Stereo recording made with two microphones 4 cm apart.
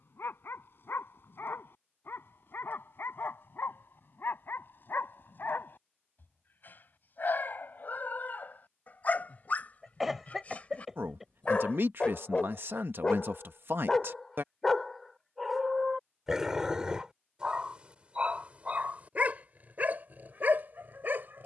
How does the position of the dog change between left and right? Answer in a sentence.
In this clip you hear the dog travel towards the right.